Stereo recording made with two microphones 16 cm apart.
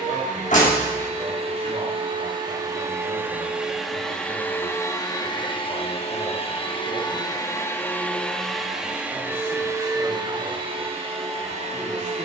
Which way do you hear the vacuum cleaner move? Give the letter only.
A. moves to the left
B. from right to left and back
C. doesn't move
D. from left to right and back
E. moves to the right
B.